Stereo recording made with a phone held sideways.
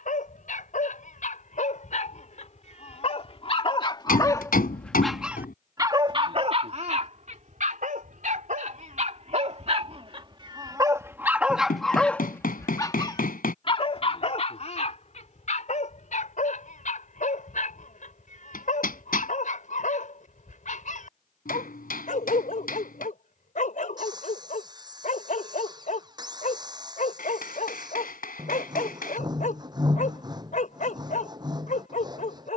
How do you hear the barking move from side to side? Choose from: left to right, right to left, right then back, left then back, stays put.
right then back.